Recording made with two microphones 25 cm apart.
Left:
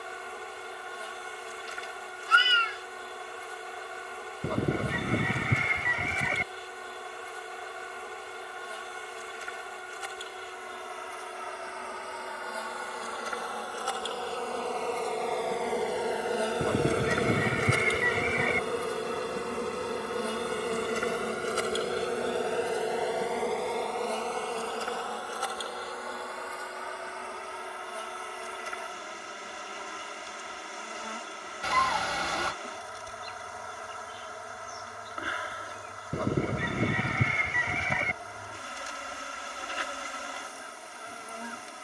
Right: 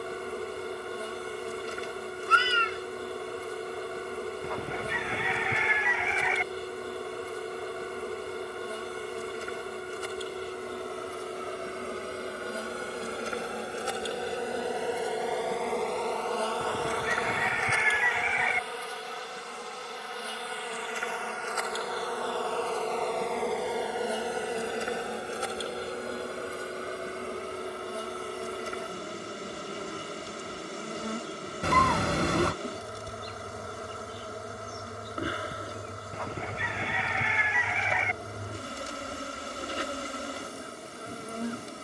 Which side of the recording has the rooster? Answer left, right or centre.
left.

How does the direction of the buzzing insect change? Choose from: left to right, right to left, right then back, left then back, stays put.
left then back.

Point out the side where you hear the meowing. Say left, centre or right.
right.